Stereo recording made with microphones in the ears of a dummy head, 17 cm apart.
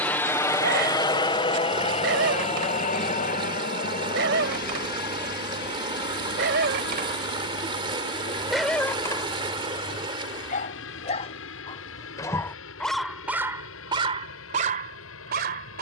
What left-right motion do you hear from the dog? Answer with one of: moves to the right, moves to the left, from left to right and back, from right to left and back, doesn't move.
from right to left and back.